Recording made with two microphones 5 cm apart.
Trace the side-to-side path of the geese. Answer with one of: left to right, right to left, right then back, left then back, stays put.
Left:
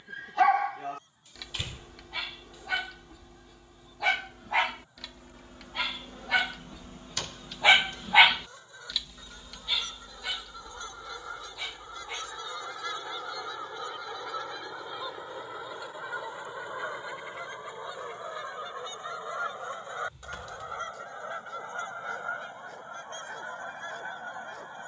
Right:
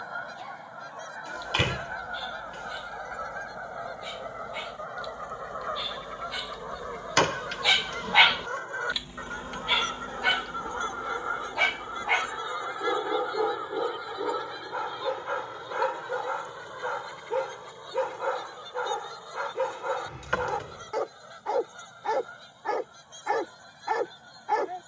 right to left.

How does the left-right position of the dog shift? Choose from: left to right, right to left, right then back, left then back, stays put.
left to right.